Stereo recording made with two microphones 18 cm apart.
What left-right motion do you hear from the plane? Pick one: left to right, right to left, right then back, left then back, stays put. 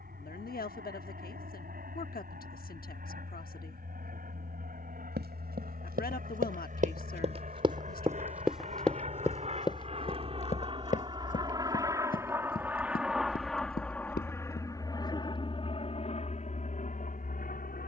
right to left.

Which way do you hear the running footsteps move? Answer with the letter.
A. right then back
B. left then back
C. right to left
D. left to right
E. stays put
C.